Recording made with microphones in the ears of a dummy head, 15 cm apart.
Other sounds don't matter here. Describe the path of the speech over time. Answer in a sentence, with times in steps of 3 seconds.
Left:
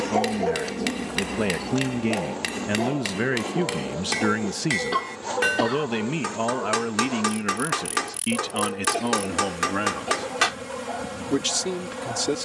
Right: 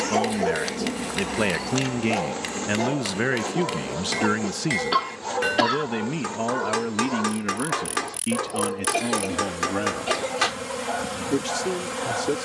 You can hear the speech on the right from 0 s, in the centre from 3 s and on the left from 6 s.